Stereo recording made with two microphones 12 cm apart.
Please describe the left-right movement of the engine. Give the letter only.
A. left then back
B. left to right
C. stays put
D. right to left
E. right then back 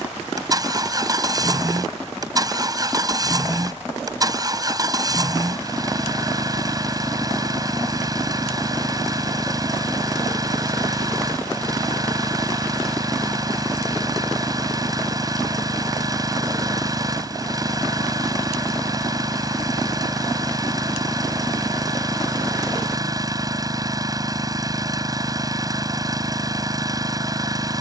C.